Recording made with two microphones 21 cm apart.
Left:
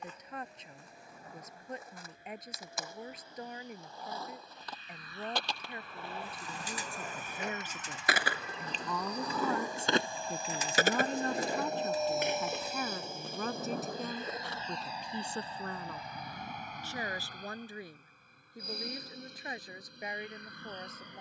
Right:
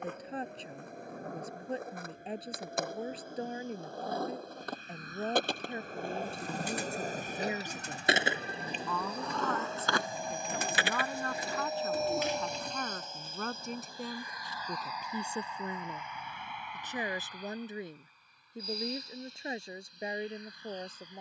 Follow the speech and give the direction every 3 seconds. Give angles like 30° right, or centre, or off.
30° right, 30° right, 20° right, 20° left, centre, 20° right, 30° right.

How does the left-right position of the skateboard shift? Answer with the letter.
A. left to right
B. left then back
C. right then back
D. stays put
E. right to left
E.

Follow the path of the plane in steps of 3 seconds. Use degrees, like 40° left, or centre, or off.
70° right, 60° right, 40° right, 20° right, 10° left, 40° left, 50° left.